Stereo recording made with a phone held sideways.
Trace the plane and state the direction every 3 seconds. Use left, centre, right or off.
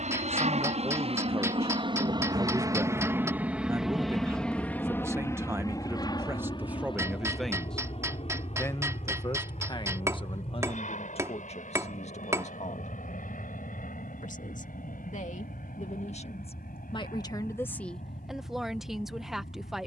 right, centre, left, left, left, left, left.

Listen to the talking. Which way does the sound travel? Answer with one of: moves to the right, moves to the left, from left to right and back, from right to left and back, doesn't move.
from right to left and back.